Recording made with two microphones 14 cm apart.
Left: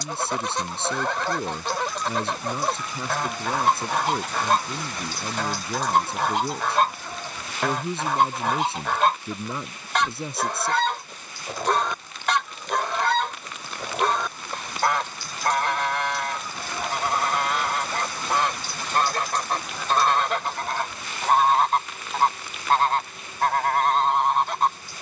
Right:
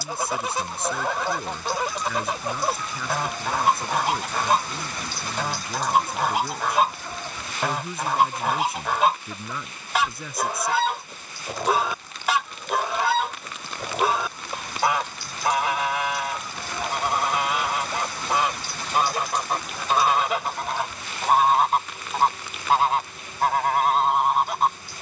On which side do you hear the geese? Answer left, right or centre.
centre.